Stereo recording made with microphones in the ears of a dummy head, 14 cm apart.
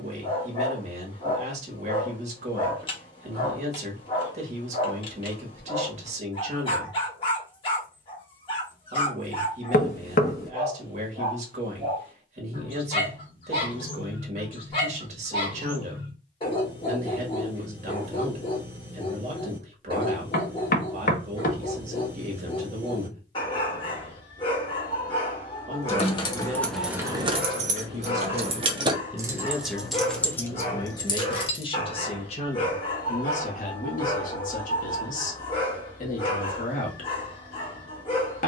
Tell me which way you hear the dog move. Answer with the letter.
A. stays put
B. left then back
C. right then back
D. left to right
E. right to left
A.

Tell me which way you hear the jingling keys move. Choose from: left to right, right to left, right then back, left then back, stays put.
right then back.